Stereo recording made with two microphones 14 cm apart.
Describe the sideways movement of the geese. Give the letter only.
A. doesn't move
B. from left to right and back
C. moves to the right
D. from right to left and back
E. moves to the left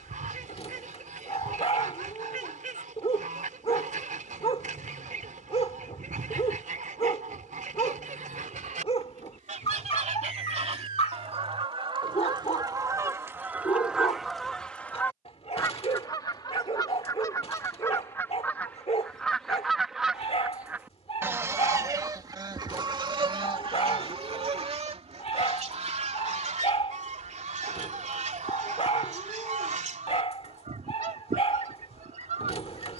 D.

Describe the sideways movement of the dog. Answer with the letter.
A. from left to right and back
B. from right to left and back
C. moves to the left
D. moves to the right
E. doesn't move
E.